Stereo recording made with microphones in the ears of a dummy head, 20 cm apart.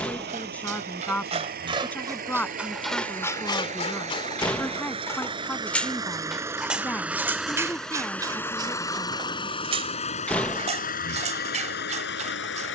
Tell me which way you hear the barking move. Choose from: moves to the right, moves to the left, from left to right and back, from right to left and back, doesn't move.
from right to left and back.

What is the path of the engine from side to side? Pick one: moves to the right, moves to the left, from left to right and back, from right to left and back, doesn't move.
moves to the left.